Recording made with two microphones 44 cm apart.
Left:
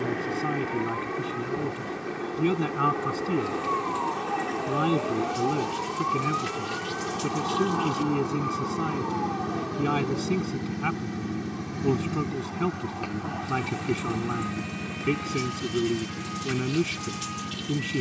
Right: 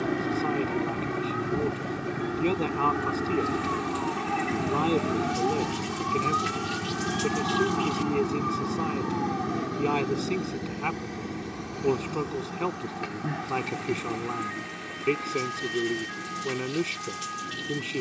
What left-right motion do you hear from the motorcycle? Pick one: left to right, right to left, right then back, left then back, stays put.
right to left.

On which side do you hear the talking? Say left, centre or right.
left.